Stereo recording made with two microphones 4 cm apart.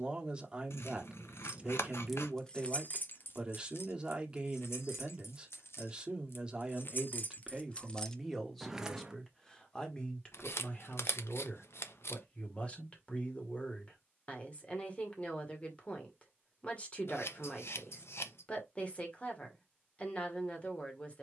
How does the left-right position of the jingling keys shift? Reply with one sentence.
You can hear the jingling keys go left and come back.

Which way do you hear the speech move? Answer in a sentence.
You can hear the speech go from the right side to the left.